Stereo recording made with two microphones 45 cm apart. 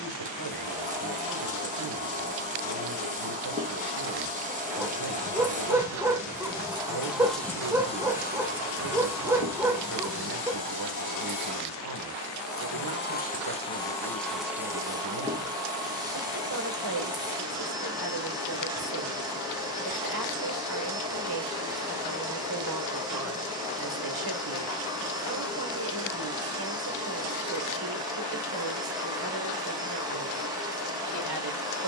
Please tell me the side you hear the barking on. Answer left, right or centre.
centre.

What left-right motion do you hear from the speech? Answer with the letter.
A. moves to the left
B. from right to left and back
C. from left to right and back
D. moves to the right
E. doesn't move
E.